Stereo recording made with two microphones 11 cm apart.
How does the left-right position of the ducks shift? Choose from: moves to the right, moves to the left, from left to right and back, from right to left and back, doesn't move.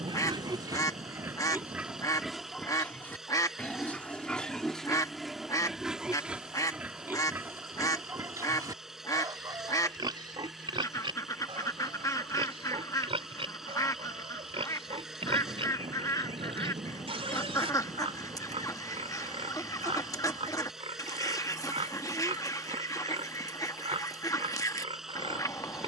doesn't move.